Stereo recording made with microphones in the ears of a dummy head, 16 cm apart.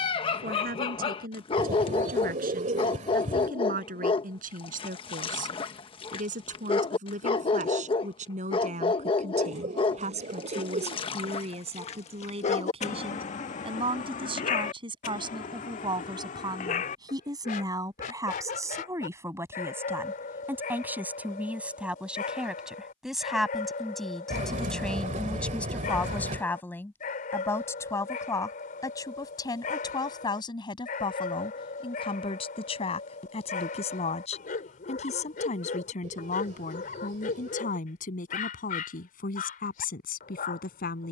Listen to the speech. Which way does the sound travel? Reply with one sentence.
You can hear the speech go from the right side to the left.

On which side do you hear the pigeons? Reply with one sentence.
In this clip you hear the pigeons on the right.